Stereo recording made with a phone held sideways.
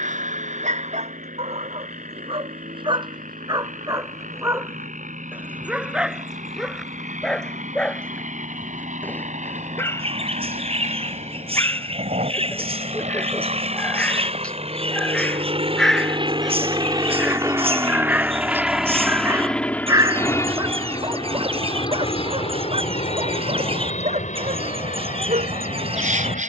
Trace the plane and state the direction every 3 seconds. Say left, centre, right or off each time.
right, right, right, right, right, right, centre, left, left.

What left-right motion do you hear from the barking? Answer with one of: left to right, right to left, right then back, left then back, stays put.
left then back.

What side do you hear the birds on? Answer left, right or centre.
right.